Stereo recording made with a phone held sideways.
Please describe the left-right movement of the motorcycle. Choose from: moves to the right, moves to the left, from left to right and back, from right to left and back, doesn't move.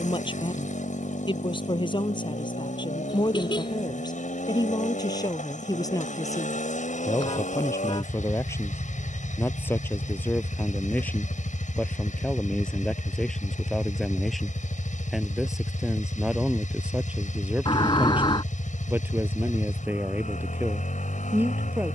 doesn't move.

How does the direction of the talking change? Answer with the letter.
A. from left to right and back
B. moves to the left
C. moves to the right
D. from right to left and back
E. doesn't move
C.